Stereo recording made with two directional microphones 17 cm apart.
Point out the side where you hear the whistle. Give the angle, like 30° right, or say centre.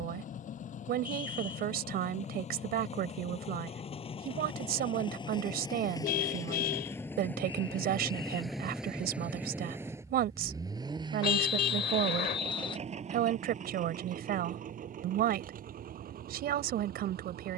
30° left.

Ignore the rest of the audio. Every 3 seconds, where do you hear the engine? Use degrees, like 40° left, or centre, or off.
50° left, 30° left, 10° left, 20° right, 40° right, 60° right.